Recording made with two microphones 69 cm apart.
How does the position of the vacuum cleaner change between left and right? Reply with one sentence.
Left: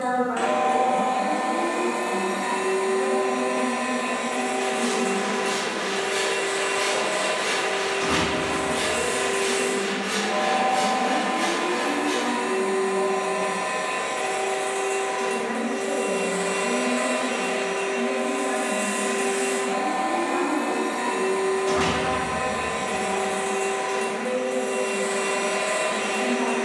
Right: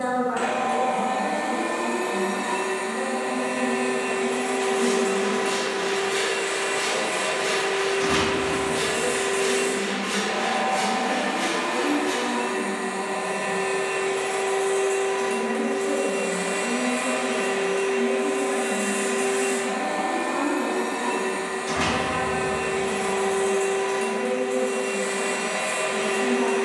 You can hear the vacuum cleaner stay in one place.